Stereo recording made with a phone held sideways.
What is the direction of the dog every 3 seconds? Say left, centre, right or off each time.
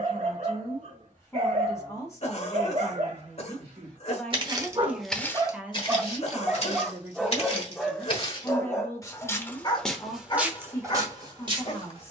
right, right, centre, left.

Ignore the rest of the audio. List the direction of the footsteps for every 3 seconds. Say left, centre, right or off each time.
off, centre, left, centre.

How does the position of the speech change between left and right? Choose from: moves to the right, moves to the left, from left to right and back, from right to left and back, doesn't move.
from left to right and back.